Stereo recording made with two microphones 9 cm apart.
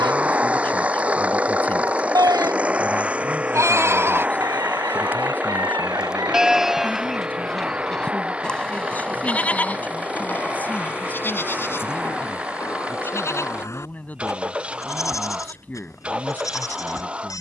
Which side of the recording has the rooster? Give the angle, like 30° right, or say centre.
50° right.